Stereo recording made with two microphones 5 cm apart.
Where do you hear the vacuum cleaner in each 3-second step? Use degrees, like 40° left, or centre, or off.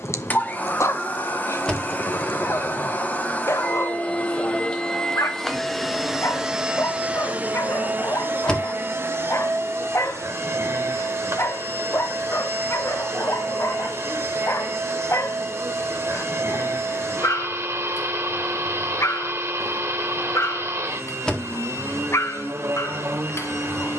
40° left, 20° left, 30° right, 60° right, 70° right, 70° right, 70° right, 70° right.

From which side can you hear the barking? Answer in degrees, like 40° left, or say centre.
70° left.